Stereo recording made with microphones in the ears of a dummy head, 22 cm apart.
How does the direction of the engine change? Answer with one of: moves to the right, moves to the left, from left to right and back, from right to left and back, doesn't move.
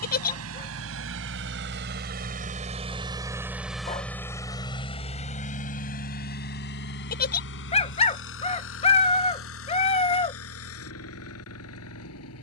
moves to the left.